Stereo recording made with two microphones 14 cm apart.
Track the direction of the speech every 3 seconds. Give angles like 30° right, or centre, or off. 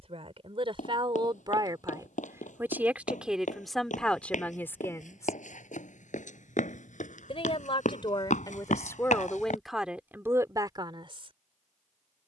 30° right, 10° left, 30° left, 10° right.